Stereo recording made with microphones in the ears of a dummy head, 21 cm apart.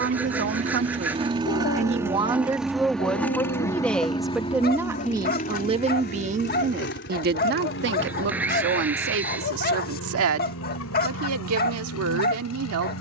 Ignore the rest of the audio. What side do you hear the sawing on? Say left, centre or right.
centre.